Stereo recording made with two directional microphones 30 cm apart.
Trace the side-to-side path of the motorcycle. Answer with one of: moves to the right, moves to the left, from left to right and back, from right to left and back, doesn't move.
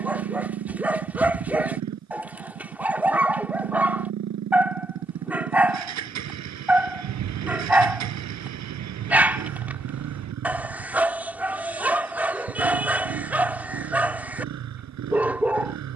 doesn't move.